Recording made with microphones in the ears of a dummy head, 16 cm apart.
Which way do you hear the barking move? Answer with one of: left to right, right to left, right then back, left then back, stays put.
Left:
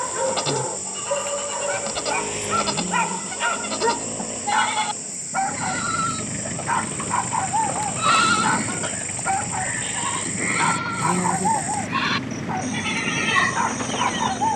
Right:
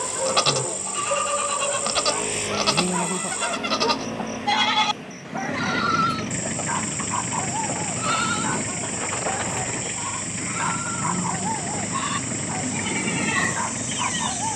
stays put.